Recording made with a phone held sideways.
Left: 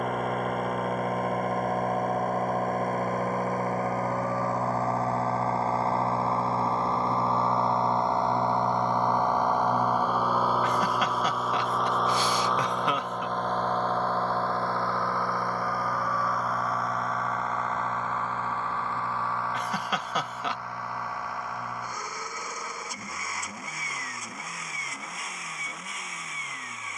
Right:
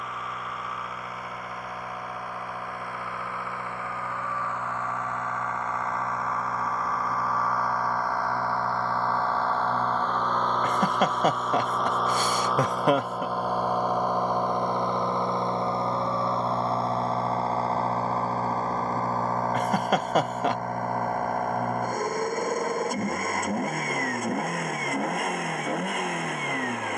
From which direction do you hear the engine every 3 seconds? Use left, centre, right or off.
left, left, left, centre, centre, right, right, right, right.